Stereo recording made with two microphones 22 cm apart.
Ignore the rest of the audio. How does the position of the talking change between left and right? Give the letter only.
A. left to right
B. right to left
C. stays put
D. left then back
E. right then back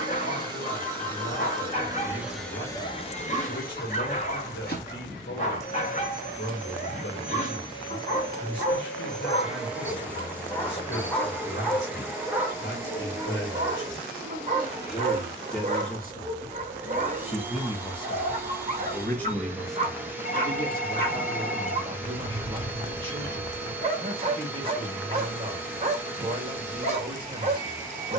A.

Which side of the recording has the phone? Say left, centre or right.
left.